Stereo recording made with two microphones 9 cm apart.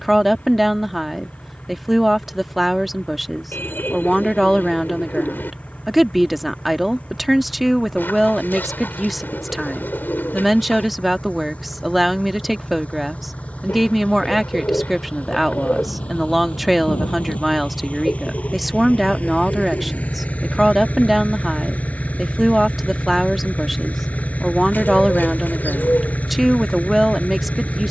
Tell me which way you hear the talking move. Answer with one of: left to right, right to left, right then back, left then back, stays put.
stays put.